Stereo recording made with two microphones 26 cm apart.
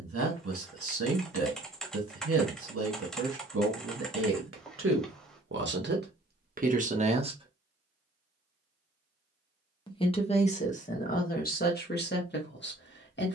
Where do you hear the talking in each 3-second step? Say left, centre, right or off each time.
right, right, right, left, left.